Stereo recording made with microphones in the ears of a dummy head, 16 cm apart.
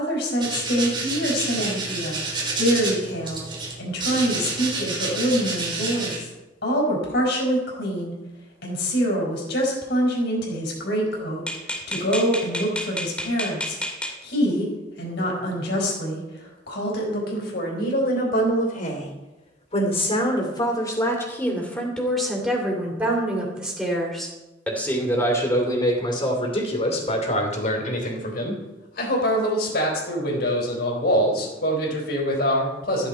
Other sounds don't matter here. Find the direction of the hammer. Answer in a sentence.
In this clip you hear the hammer in the centre.